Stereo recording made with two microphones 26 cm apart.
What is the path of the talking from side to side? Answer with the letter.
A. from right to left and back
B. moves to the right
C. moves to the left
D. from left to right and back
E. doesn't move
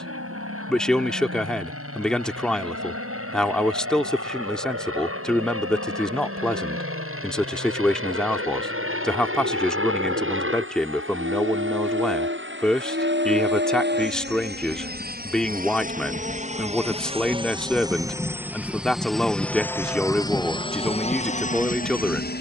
E.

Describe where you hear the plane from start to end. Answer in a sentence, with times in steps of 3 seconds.
You can hear the plane on the right from 0 s, in the centre from 18 s and on the left from 21 s.